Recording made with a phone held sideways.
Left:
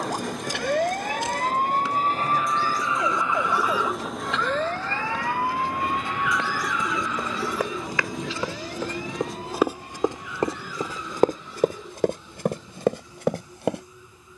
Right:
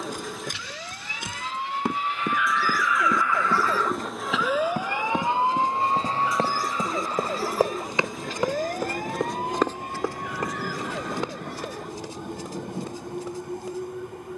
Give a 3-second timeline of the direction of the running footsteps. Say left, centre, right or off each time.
right, right, right, left, left.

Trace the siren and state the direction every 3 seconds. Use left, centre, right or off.
left, centre, right, right, right.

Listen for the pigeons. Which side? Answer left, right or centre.
centre.